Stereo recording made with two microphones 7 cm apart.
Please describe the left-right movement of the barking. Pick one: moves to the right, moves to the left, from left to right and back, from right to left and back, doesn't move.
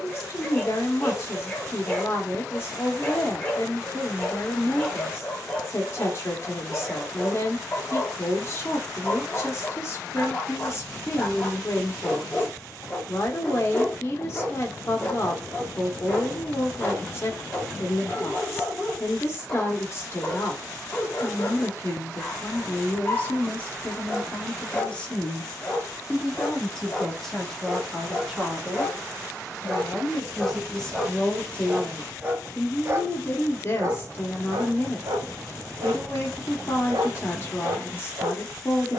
moves to the right.